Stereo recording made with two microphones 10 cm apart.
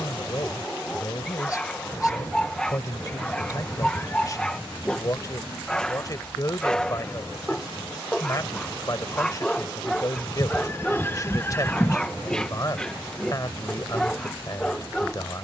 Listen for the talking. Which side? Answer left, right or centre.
left.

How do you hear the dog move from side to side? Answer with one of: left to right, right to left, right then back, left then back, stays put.
stays put.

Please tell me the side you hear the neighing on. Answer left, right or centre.
left.